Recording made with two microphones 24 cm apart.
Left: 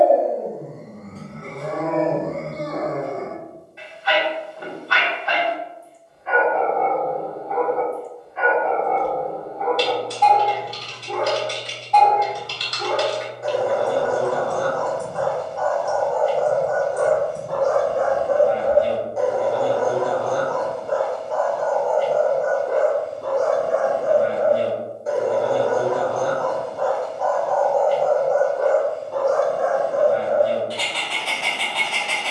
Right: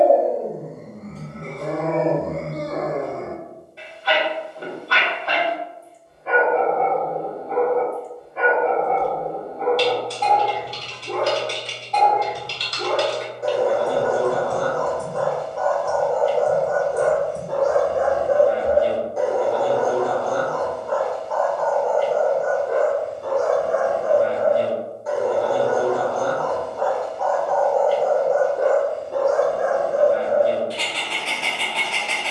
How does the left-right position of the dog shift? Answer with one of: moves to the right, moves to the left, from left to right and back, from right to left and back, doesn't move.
from right to left and back.